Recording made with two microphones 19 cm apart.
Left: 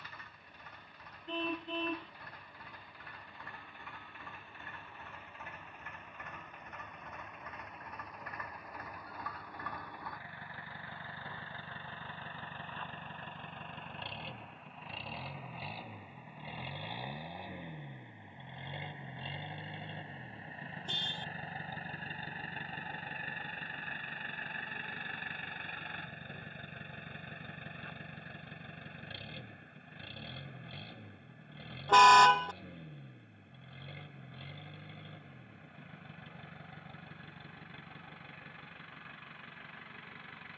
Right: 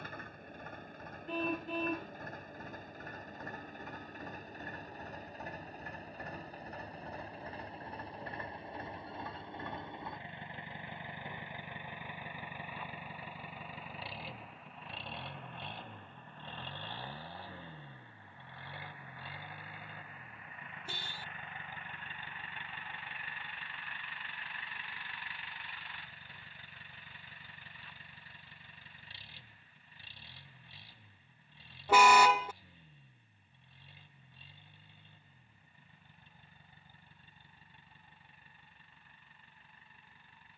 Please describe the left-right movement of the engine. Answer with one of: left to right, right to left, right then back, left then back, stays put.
right to left.